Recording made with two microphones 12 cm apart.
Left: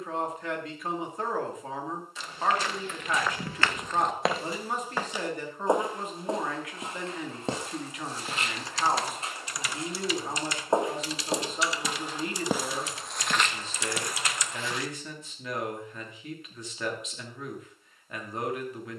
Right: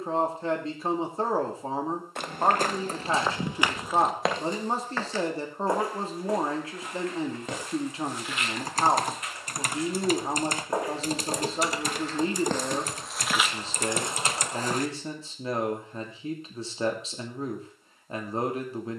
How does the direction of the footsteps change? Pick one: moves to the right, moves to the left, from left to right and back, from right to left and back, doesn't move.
from right to left and back.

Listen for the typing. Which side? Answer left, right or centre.
right.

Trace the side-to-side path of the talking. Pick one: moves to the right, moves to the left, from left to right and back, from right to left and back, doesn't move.
doesn't move.